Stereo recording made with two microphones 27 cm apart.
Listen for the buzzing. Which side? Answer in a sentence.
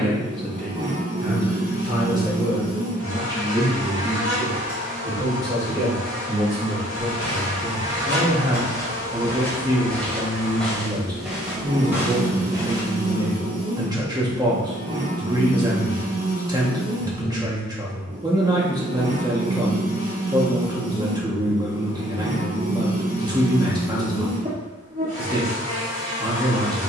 In this clip you hear the buzzing on the right.